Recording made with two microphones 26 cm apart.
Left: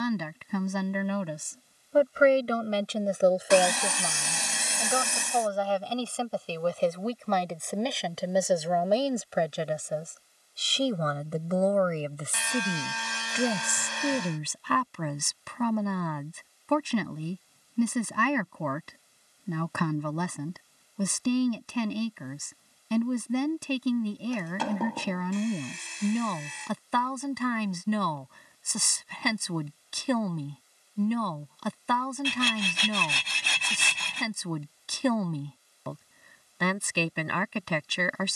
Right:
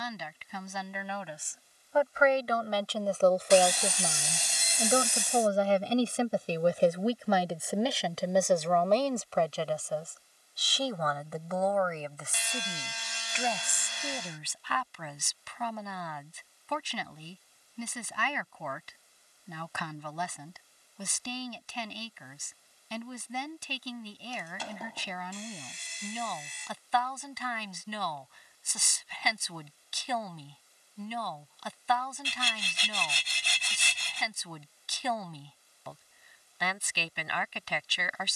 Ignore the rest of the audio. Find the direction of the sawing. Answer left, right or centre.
left.